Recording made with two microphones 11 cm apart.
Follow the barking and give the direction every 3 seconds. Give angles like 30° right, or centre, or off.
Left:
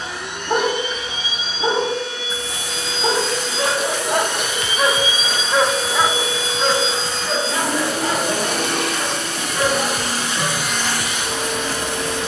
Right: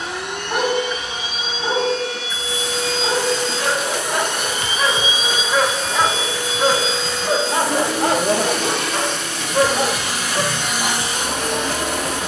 30° left, 20° left, 40° right, 60° right.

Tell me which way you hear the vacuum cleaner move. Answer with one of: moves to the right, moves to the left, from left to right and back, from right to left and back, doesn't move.
from right to left and back.